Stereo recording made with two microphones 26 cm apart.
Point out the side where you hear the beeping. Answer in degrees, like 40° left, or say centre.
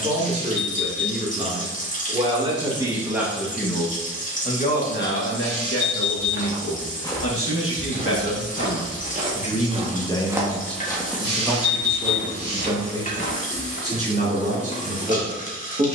50° right.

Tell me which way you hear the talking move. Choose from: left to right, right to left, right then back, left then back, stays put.
left then back.